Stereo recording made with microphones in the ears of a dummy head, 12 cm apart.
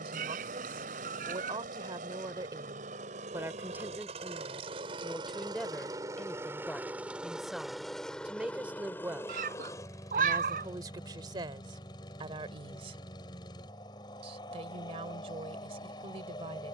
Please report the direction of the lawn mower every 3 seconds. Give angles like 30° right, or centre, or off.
60° right, 40° right, centre, 30° left, 30° left, 30° left.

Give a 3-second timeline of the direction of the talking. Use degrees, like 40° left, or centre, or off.
30° right, 10° right, centre, 30° right, 40° right, 40° right.